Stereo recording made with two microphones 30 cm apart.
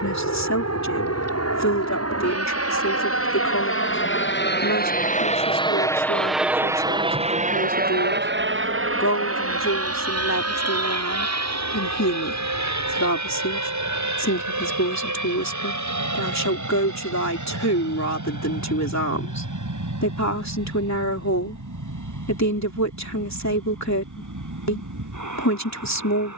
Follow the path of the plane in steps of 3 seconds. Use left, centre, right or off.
left, left, right, right, right, right, right, right, right.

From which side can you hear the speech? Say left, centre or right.
left.